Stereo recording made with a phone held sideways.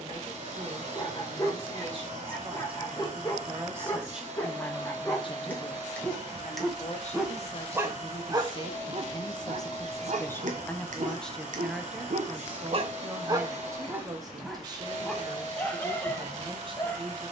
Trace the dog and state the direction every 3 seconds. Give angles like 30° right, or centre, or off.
20° left, 20° left, 10° right, 70° right, 20° right, 20° left.